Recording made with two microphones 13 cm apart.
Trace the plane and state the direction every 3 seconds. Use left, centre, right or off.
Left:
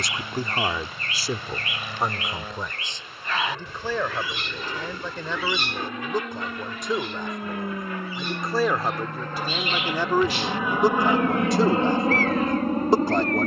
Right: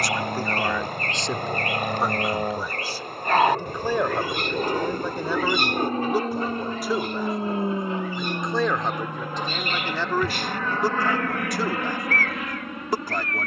right, right, right, centre, left.